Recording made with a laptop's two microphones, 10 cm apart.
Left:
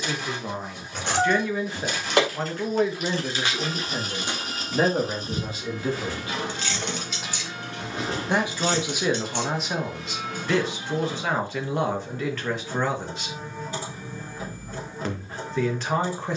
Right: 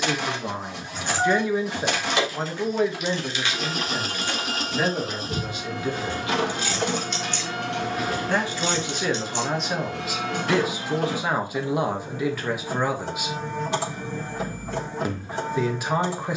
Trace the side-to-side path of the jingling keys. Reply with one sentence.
You can hear the jingling keys move from left to right and back again.